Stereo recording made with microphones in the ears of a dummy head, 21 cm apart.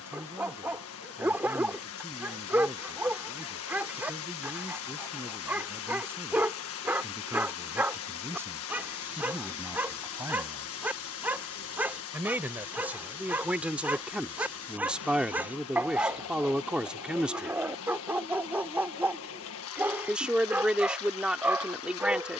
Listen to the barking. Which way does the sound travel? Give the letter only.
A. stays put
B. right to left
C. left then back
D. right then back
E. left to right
A.